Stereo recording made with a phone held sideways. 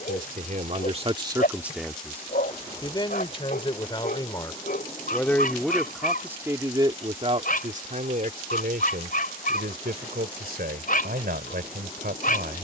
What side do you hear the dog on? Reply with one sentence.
You can hear the dog on the left.